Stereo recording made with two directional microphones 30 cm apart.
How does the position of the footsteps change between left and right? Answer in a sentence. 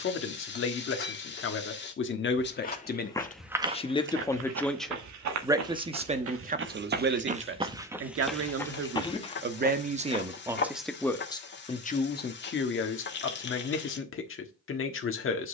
In this clip you hear the footsteps go right and come back.